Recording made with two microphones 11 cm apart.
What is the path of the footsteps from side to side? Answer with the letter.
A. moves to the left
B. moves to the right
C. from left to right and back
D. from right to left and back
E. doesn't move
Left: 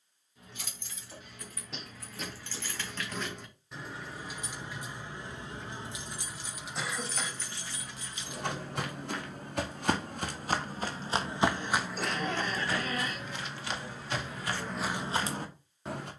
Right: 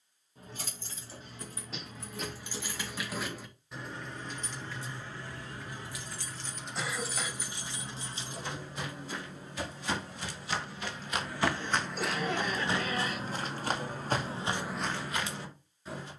C.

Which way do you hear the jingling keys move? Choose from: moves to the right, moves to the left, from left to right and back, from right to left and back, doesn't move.
from right to left and back.